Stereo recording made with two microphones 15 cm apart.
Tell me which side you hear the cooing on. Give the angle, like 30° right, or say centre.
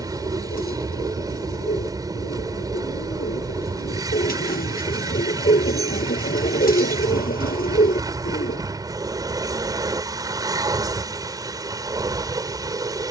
70° left.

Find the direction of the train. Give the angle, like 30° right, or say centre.
20° right.